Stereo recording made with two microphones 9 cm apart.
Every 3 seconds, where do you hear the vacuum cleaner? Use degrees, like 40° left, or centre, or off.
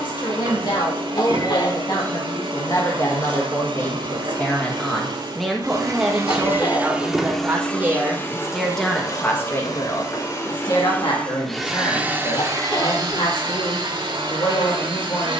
80° right, 70° right, centre, 30° left, 60° right.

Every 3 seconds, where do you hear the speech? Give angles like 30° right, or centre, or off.
50° left, 20° left, 10° right, 50° left, 60° left.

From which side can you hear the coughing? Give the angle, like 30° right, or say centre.
60° left.